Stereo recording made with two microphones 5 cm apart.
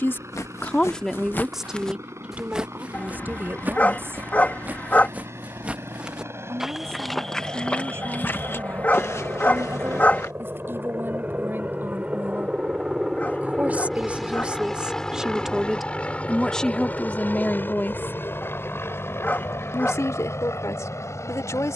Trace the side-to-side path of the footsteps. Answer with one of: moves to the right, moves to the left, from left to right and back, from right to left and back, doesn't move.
from left to right and back.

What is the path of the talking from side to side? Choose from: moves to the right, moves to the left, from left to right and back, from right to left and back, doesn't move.
from left to right and back.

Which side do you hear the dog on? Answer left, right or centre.
left.